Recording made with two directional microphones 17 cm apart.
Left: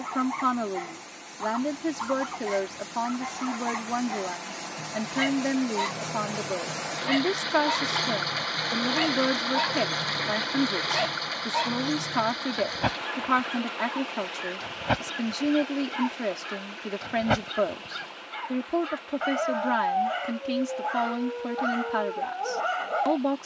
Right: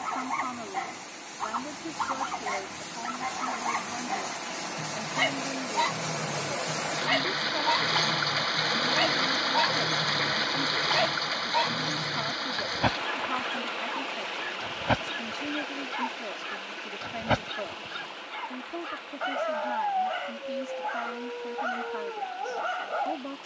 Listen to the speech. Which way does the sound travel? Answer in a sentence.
In this clip you hear the speech stay in one place.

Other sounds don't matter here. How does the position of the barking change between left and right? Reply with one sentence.
You can hear the barking move from right to left.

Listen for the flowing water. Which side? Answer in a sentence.
In this clip you hear the flowing water in the centre.